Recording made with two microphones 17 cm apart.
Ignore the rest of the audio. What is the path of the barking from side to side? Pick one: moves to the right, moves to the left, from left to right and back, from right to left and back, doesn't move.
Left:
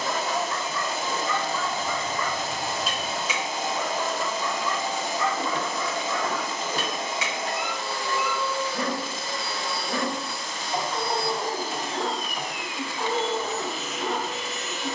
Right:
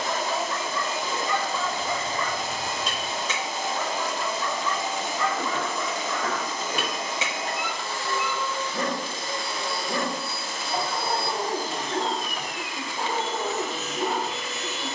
from right to left and back.